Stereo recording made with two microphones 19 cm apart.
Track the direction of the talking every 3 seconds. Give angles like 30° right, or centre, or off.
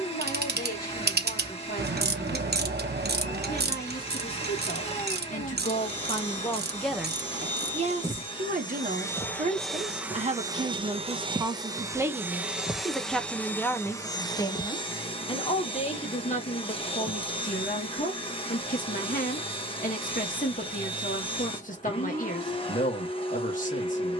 50° left, 50° left, 10° right, 30° right, 10° left, 40° left, 40° left, 40° left.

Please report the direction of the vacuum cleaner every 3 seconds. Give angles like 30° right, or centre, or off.
30° left, 30° left, 30° left, 10° right, 10° left, 30° left, 30° left, 30° left.